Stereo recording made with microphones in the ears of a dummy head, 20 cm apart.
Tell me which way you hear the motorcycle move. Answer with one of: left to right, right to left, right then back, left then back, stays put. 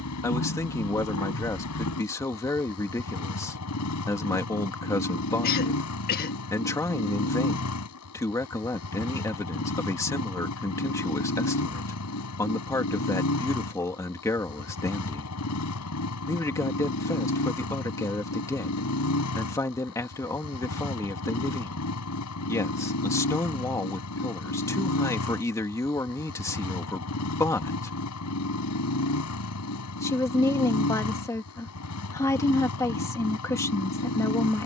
stays put.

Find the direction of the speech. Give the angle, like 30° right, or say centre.
10° left.